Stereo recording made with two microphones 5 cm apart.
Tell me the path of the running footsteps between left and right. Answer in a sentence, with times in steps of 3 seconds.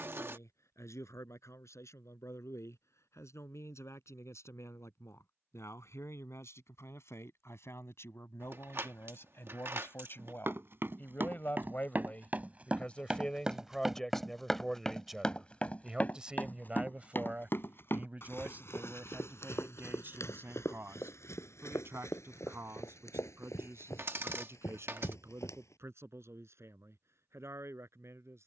In this clip you hear the running footsteps not at all from 0 s, on the right from 9 s, in the centre from 12 s, on the left from 15 s and not at all from 27 s.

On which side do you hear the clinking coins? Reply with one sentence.
In this clip you hear the clinking coins on the right.